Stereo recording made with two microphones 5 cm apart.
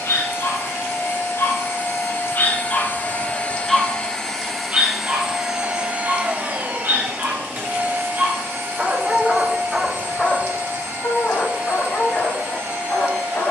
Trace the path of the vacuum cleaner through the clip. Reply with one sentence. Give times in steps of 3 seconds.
In this clip you hear the vacuum cleaner on the left from 0 s, in the centre from 3 s and on the right from 6 s.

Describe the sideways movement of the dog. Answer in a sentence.
You can hear the dog move from left to right and back again.